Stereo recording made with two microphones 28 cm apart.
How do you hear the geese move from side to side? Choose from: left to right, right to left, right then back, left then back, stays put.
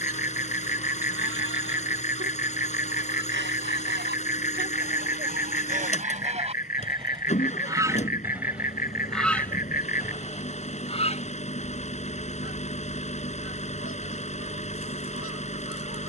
right to left.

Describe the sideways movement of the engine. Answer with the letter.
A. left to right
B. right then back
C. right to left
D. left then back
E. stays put
E.